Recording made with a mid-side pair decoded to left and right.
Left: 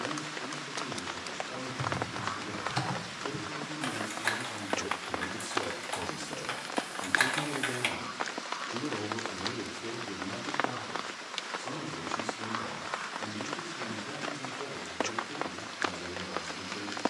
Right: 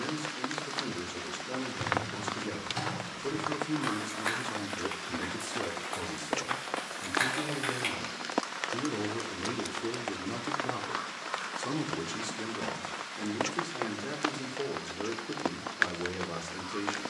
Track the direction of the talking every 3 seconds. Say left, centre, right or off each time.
right, right, centre, right, right, right.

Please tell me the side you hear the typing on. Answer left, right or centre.
left.